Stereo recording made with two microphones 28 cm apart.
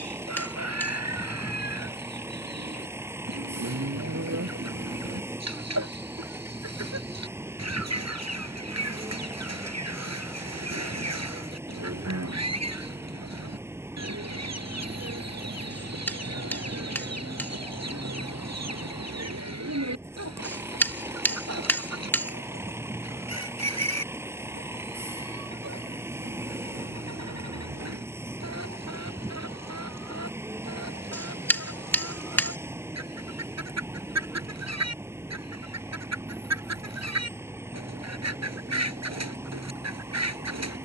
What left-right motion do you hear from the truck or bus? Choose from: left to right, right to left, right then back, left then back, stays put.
stays put.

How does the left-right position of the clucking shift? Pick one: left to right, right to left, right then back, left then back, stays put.
stays put.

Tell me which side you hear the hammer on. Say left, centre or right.
centre.